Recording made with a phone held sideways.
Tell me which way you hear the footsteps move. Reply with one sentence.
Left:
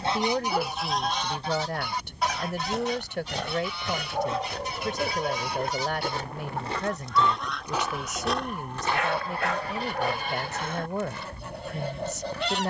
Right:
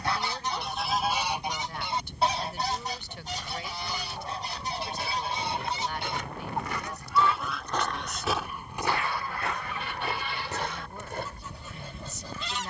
You can hear the footsteps go from the left side to the right.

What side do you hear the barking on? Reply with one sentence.
In this clip you hear the barking on the left.